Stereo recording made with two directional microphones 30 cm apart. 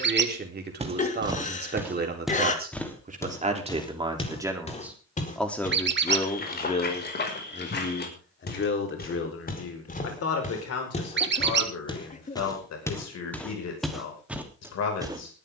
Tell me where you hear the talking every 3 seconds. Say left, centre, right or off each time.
right, centre, left, left, left.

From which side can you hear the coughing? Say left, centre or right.
left.